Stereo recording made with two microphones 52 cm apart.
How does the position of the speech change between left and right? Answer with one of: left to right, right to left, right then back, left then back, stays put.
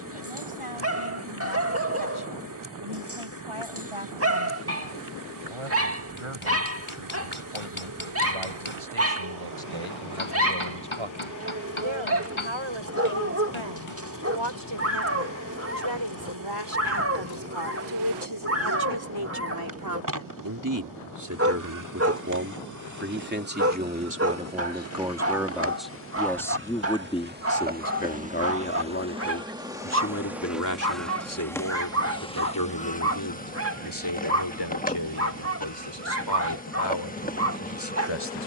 right to left.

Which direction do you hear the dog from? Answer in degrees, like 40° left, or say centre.
30° right.